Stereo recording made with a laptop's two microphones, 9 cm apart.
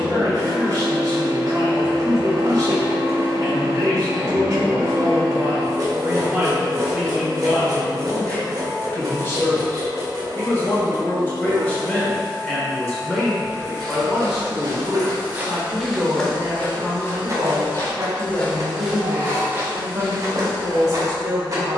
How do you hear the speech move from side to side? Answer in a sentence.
In this clip you hear the speech move from right to left and back again.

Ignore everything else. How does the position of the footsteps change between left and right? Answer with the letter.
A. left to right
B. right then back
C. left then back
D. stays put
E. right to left
C.